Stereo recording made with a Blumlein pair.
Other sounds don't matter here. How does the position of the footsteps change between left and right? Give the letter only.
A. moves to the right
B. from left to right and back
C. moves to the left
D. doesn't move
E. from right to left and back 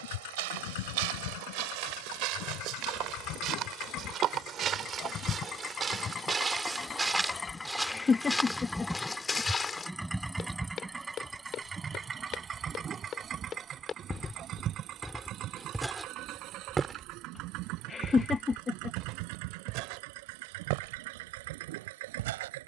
E.